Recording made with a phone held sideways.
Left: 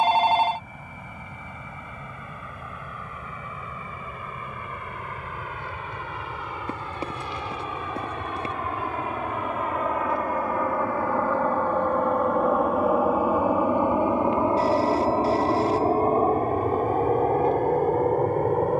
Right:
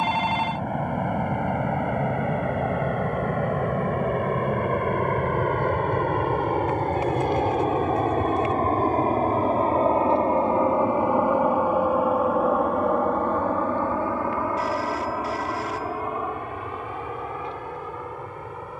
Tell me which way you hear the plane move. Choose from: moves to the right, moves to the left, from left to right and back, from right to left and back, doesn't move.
moves to the left.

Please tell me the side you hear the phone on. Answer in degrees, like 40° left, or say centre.
30° left.